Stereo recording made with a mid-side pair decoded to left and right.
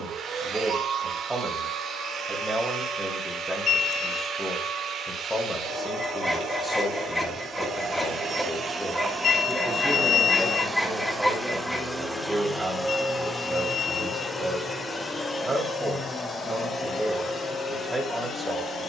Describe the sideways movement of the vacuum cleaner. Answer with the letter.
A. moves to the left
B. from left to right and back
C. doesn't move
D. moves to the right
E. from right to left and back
A.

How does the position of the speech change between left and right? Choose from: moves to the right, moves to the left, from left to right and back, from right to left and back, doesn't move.
from right to left and back.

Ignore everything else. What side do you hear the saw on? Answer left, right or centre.
centre.